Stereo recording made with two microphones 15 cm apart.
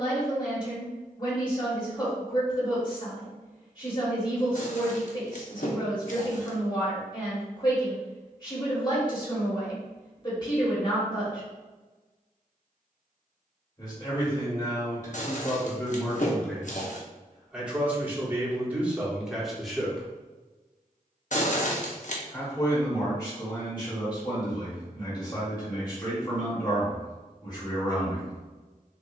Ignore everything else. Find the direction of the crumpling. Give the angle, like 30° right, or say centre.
60° left.